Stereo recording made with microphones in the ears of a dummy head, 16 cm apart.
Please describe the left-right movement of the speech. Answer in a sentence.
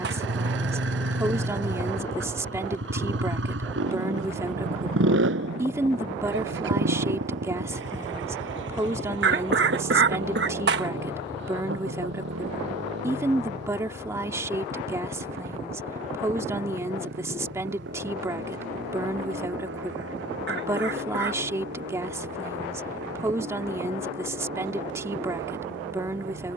You can hear the speech stay in one place.